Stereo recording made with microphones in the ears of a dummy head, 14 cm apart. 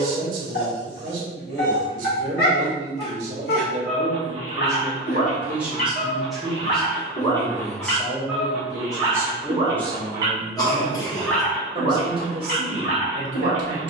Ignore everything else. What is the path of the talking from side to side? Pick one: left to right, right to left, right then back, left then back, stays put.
left then back.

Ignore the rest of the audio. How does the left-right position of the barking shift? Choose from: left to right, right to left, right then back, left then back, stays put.
right then back.